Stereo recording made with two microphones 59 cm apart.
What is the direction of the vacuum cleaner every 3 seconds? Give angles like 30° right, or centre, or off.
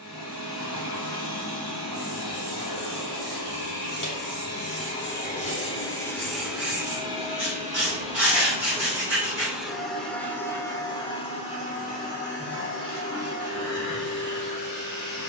40° left, 30° left, 10° right, centre, 30° left.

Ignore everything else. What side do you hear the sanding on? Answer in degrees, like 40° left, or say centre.
50° right.